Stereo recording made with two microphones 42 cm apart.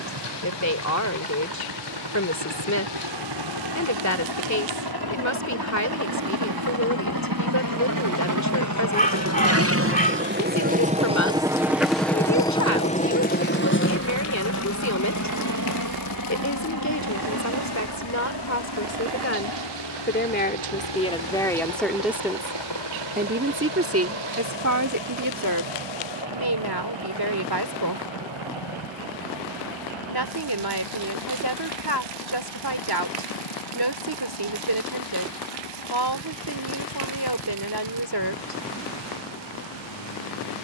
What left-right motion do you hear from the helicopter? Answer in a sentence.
In this clip you hear the helicopter travel towards the left.